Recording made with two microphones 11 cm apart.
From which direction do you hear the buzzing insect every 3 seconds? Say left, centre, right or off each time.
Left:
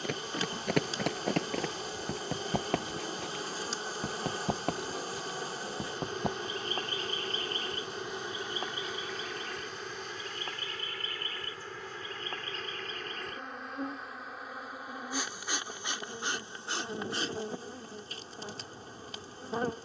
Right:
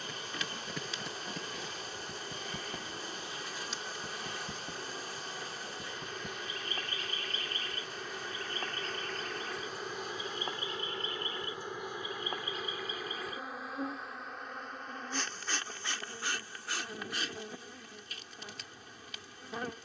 left, left, left, centre, centre, left, left.